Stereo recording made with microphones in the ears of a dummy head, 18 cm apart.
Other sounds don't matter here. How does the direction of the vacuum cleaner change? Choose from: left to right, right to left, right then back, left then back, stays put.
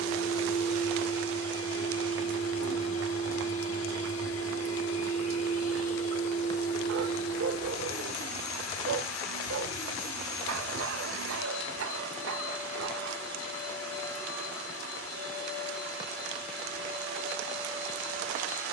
stays put.